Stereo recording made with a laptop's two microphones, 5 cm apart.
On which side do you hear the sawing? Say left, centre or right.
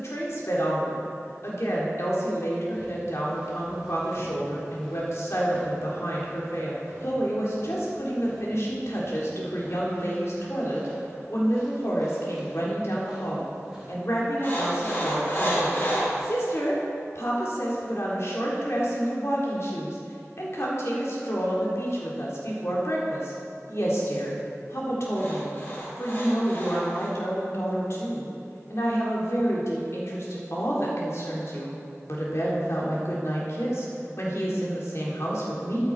left.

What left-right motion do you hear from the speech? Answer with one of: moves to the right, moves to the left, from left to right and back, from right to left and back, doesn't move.
doesn't move.